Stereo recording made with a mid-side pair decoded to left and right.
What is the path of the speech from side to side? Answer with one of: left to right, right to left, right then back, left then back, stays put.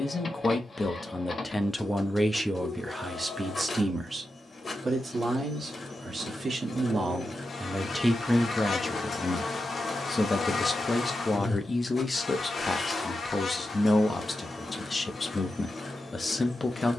right then back.